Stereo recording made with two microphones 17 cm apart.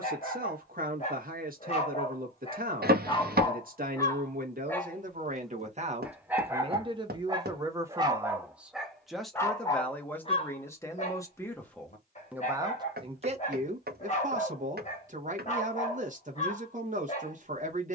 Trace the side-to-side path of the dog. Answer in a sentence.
In this clip you hear the dog move from left to right and back again.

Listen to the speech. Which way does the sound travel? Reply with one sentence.
In this clip you hear the speech go left and come back.